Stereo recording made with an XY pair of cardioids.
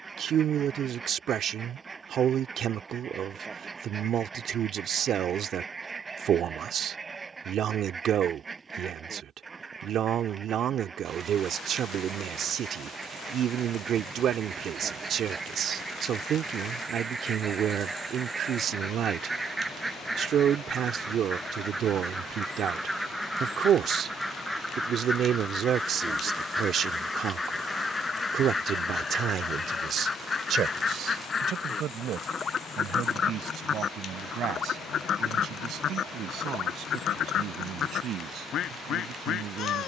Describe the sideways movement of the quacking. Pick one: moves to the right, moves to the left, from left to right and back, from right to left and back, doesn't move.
moves to the left.